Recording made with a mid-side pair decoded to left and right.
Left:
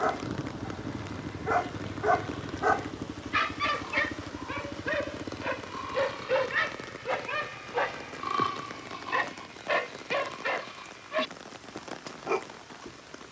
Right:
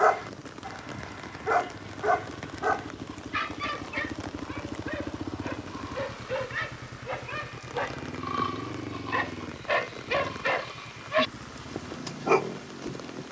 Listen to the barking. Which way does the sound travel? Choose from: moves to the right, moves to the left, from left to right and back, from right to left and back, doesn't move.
from right to left and back.